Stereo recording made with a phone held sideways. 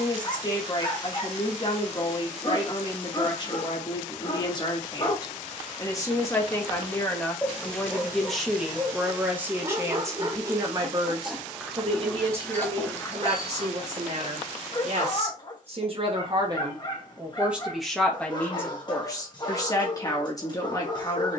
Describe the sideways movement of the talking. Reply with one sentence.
You can hear the talking go right and come back.